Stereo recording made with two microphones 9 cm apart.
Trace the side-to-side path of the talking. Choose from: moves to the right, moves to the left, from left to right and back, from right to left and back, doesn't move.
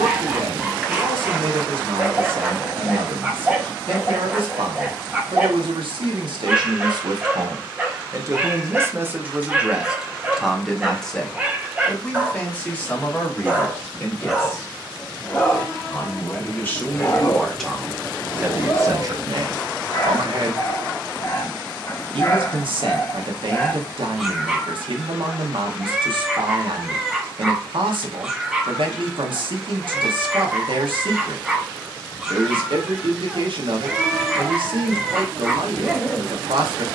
from right to left and back.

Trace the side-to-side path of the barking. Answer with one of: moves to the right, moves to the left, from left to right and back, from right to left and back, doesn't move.
from right to left and back.